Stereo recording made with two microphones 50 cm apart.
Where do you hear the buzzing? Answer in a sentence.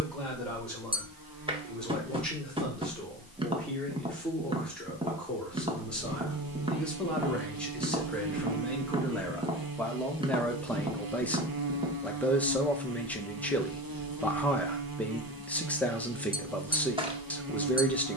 You can hear the buzzing on the right.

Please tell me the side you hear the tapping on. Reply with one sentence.
In this clip you hear the tapping in the centre.